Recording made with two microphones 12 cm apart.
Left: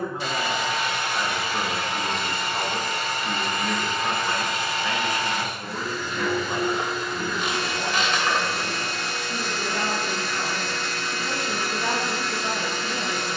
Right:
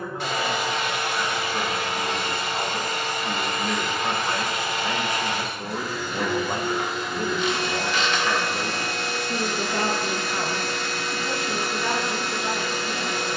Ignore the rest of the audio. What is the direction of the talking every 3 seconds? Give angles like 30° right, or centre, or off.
20° left, 20° right, 60° right, 30° right, 20° left.